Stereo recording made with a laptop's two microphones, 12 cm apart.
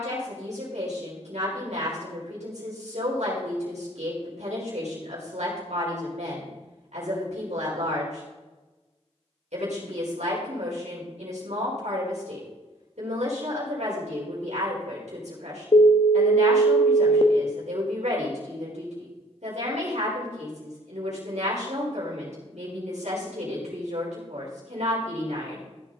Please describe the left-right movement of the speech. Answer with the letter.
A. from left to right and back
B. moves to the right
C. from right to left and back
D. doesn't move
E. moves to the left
D.